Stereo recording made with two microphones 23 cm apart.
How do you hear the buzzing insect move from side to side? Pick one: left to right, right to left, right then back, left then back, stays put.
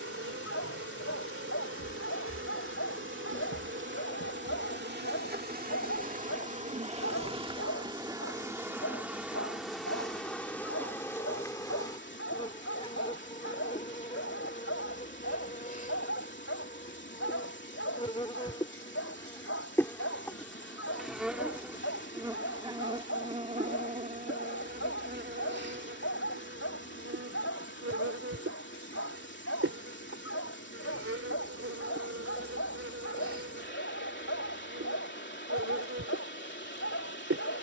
left then back.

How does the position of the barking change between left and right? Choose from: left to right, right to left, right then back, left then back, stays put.
stays put.